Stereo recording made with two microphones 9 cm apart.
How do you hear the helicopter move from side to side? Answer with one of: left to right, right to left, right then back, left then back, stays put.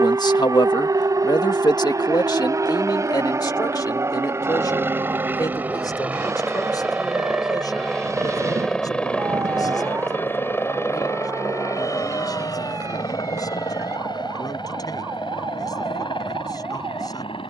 right to left.